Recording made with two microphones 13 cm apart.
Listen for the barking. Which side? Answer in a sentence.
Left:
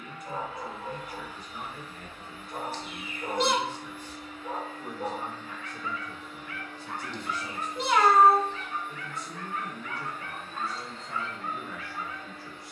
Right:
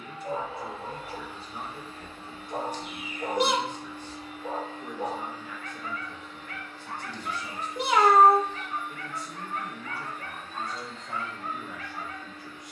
You can hear the barking on the right.